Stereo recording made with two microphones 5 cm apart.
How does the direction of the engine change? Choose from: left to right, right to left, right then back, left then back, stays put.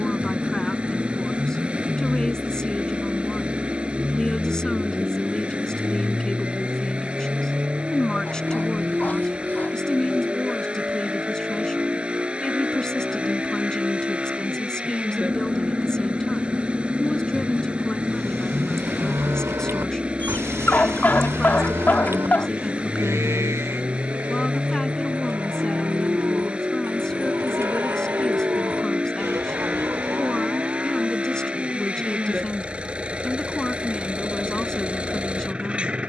stays put.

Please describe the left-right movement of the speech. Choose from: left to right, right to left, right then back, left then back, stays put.
stays put.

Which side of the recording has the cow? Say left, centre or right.
right.